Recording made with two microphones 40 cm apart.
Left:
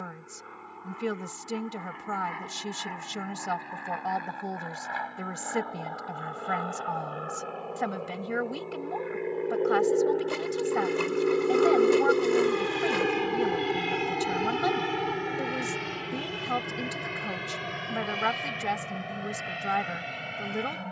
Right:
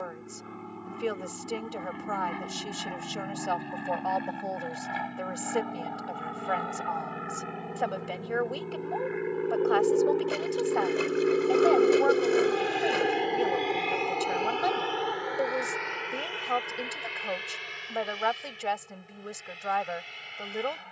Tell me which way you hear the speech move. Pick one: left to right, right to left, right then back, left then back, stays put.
stays put.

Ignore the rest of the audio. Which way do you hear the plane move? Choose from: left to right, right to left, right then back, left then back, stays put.
right to left.